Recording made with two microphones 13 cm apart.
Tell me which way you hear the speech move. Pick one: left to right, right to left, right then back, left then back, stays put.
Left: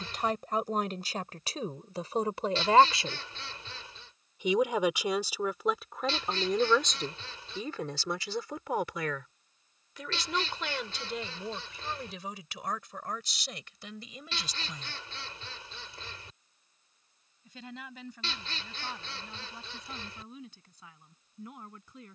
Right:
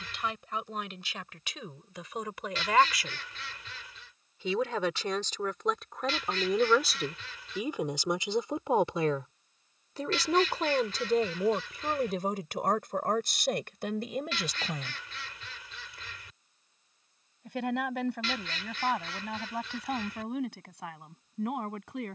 left to right.